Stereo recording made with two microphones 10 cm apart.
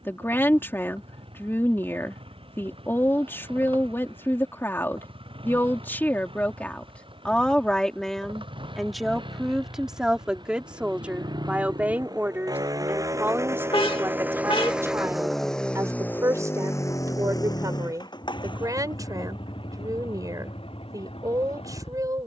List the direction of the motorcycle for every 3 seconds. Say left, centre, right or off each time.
right, right, right, right, right, left, left, left.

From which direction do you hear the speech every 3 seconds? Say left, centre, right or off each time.
left, left, centre, centre, right, right, right, right.